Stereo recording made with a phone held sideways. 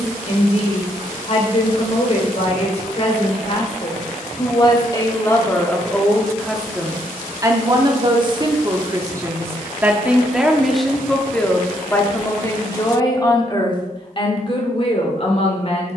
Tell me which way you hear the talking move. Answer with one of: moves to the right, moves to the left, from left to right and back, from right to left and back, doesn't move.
from left to right and back.